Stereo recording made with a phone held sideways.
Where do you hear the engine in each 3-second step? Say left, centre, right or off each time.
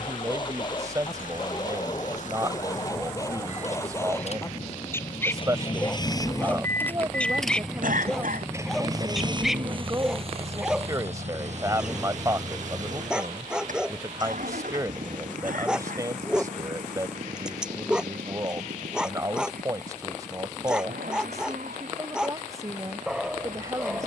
left, left, centre, right, right, right, right, right.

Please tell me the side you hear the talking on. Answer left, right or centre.
right.